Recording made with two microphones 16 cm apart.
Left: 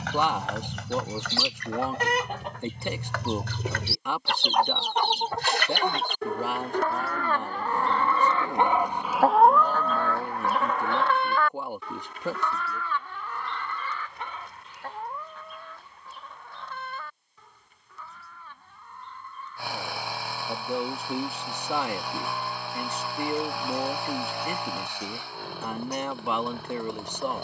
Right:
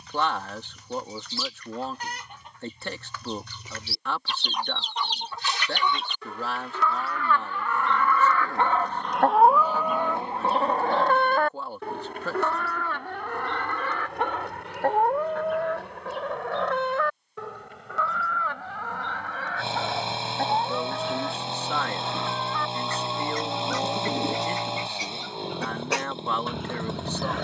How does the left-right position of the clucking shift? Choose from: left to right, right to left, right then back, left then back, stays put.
left to right.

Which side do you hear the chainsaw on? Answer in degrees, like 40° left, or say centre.
20° right.